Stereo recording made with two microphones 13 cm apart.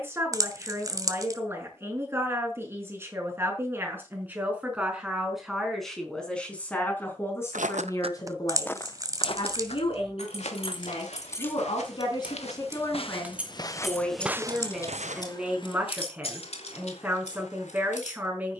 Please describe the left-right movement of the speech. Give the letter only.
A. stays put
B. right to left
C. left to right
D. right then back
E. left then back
E.